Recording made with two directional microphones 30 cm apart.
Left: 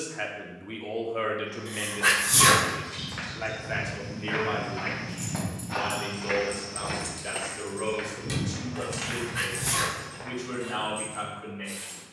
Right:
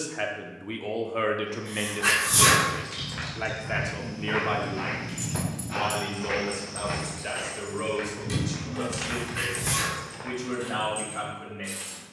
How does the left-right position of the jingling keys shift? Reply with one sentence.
In this clip you hear the jingling keys move from right to left and back again.